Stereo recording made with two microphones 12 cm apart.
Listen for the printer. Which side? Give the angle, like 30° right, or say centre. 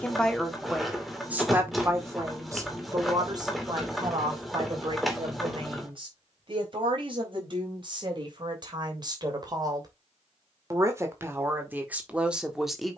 centre.